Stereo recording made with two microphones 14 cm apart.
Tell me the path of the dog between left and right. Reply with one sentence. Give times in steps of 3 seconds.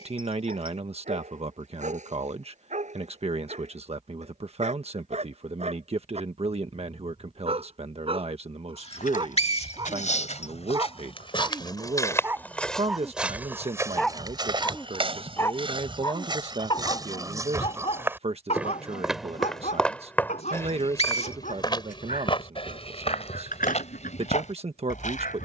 You can hear the dog on the right from 0 s, in the centre from 12 s and on the left from 15 s.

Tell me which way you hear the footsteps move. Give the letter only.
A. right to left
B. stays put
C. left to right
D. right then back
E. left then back
D.